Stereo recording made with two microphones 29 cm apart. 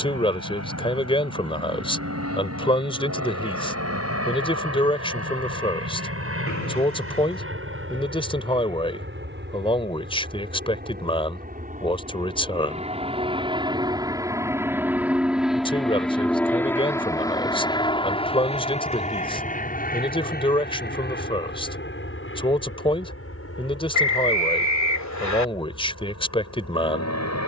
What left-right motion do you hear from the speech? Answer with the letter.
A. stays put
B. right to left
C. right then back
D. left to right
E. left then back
A.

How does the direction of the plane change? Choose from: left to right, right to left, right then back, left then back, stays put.
right to left.